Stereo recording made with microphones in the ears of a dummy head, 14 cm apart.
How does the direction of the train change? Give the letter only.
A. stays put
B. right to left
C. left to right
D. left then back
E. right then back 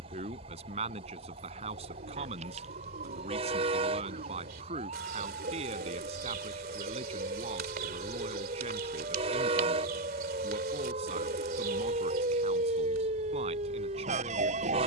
A.